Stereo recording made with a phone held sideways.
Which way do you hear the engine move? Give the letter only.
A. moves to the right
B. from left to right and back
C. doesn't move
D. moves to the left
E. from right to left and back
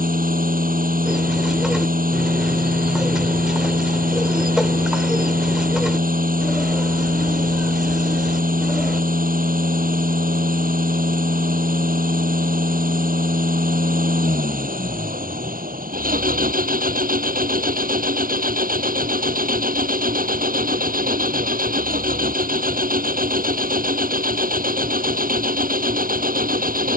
C.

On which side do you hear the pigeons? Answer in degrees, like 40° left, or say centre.
10° right.